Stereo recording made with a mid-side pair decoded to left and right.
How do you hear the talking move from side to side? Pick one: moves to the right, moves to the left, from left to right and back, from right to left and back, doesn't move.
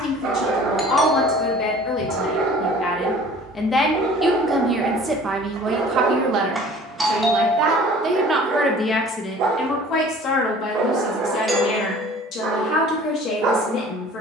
from left to right and back.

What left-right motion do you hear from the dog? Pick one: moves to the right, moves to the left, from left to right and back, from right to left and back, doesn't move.
doesn't move.